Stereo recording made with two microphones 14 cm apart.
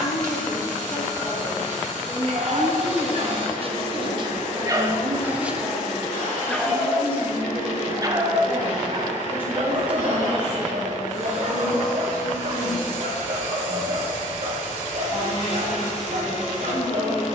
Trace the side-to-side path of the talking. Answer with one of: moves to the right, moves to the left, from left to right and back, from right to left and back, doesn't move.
from left to right and back.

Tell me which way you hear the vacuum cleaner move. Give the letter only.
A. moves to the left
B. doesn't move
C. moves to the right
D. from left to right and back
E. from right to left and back
B.